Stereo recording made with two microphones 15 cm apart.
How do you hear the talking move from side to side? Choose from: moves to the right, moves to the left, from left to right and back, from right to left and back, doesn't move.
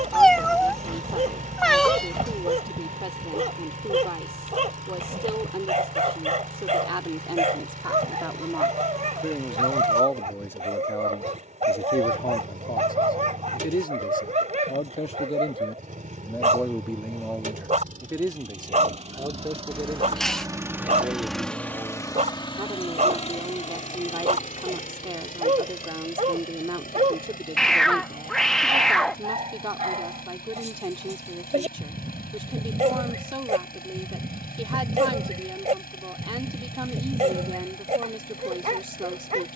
from right to left and back.